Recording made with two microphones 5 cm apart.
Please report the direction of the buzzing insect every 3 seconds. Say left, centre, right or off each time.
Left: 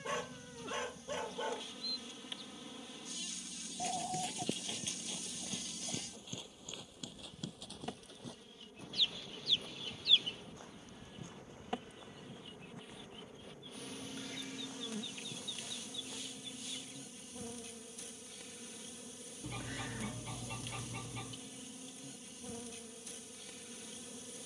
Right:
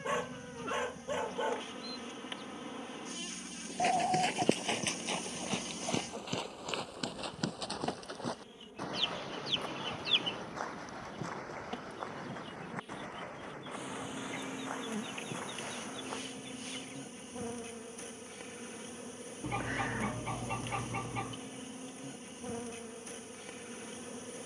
right, right, right, centre, centre, right, right, right.